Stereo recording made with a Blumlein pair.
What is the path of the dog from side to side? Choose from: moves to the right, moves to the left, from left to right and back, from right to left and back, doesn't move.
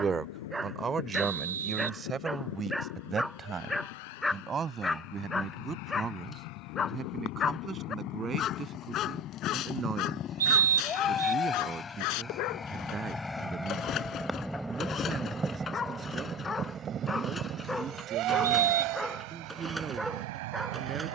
from right to left and back.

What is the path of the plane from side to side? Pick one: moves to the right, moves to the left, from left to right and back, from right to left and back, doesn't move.
moves to the right.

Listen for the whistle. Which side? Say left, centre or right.
right.